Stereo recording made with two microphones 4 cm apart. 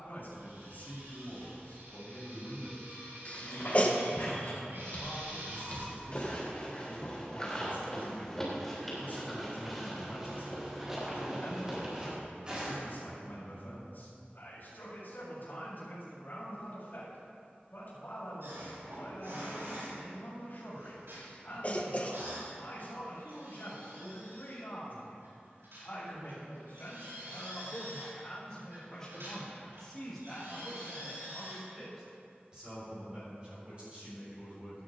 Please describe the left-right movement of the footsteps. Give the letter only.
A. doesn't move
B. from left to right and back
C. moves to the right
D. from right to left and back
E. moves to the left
C.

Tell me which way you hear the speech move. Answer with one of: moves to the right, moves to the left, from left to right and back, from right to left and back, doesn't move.
moves to the right.